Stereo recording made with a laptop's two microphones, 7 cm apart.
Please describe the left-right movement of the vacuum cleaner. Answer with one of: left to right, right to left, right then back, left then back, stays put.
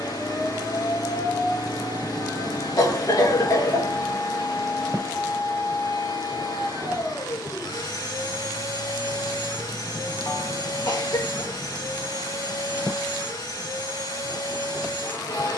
stays put.